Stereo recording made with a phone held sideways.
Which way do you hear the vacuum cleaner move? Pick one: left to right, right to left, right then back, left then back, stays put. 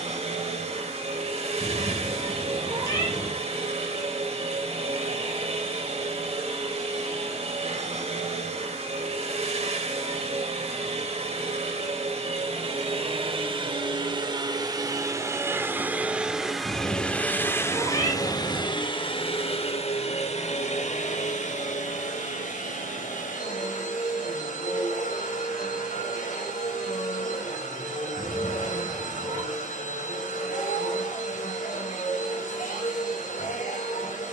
right to left.